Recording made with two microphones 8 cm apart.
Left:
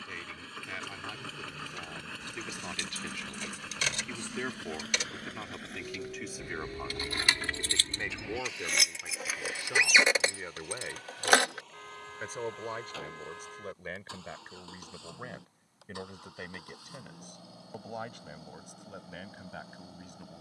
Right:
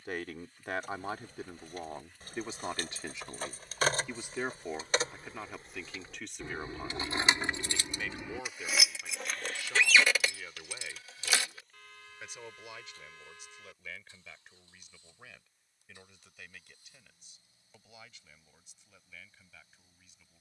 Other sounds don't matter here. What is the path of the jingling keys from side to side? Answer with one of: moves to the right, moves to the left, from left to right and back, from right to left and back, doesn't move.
moves to the left.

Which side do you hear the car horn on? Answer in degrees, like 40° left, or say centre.
40° left.